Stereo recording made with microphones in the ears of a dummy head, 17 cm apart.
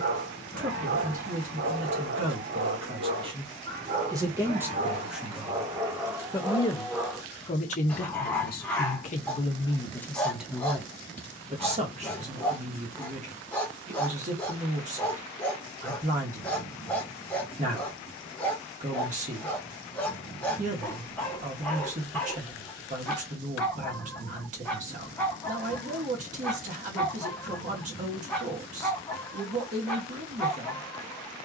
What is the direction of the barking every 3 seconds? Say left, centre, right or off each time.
right, right, centre, centre, centre, centre, centre, centre, centre, centre, centre.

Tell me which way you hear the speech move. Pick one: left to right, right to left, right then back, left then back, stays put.
left then back.